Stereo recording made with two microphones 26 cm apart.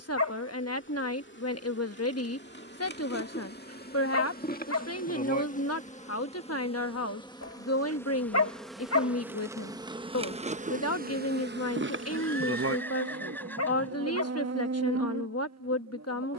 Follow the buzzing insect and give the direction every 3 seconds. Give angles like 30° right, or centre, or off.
40° left, 30° left, 10° left, 30° right, 60° right, 80° right.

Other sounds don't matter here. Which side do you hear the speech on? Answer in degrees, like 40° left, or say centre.
70° left.